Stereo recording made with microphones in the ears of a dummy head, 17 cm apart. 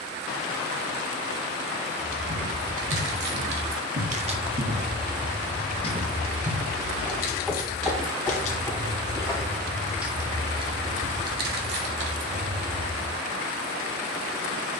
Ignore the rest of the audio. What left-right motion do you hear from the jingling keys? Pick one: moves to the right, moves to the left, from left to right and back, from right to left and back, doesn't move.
from right to left and back.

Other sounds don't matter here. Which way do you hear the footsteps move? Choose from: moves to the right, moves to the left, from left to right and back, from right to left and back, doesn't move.
moves to the left.